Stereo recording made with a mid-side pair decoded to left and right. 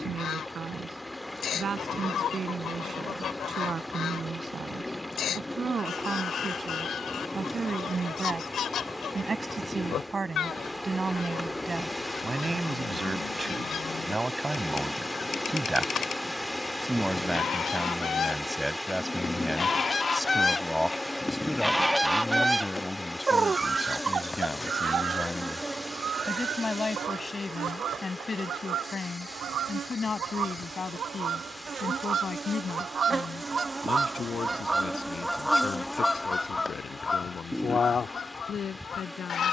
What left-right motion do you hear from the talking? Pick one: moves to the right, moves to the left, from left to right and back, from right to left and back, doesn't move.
moves to the left.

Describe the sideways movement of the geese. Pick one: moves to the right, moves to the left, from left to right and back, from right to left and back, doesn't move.
from left to right and back.